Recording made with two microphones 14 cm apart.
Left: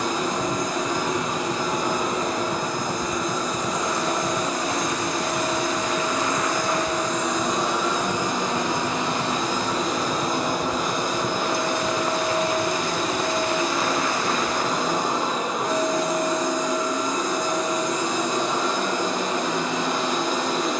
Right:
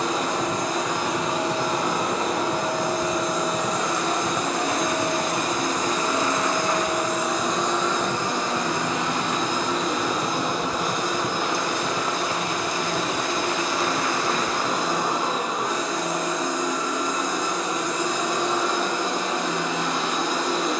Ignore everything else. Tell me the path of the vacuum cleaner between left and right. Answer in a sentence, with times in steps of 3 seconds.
In this clip you hear the vacuum cleaner on the right from 0 s, in the centre from 6 s and on the left from 9 s.